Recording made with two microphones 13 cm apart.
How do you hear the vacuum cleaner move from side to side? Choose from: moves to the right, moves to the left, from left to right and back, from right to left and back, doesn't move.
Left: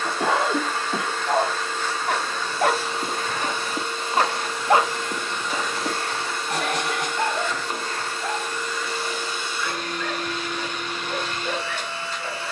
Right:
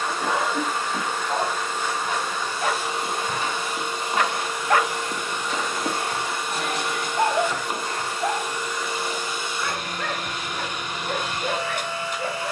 doesn't move.